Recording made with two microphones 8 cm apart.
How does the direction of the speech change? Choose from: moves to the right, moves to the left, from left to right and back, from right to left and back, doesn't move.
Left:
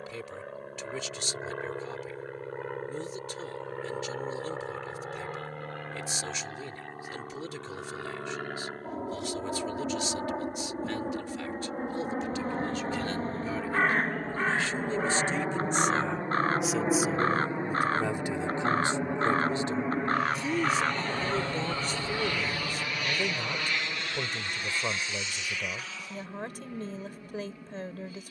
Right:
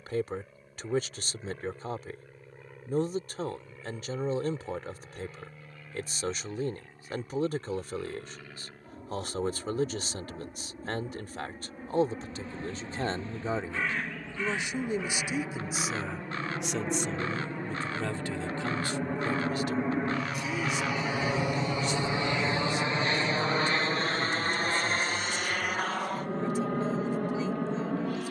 moves to the left.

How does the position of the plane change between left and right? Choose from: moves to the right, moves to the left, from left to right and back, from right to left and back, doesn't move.
moves to the right.